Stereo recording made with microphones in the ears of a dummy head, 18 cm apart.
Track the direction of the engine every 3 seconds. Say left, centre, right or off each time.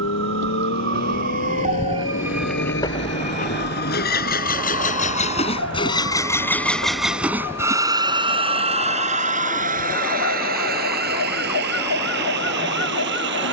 left, left, centre, right, right.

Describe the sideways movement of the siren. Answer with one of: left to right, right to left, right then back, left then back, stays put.
right to left.